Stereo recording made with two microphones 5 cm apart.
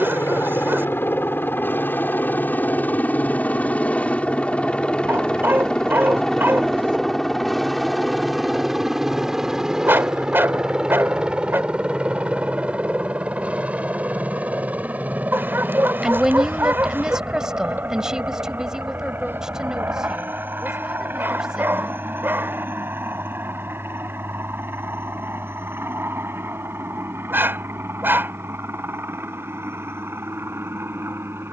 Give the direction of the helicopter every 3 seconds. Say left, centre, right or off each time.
left, left, centre, centre, right, right, right, right, right, right, right.